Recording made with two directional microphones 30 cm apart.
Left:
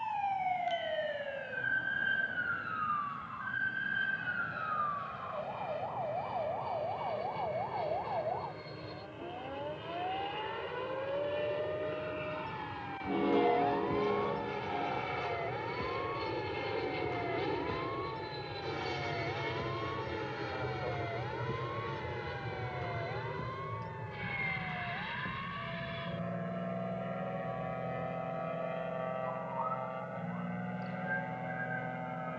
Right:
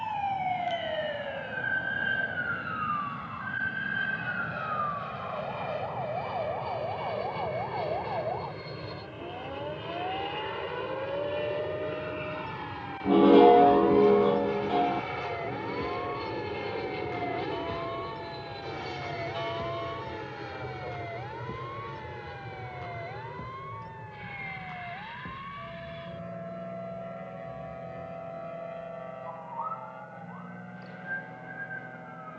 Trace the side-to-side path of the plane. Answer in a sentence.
You can hear the plane go from the right side to the left.